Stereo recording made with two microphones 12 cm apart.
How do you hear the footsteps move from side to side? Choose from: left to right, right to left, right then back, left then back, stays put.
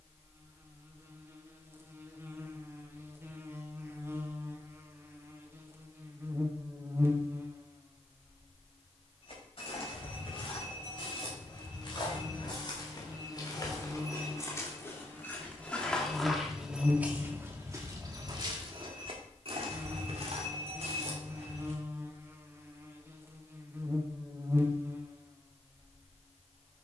left to right.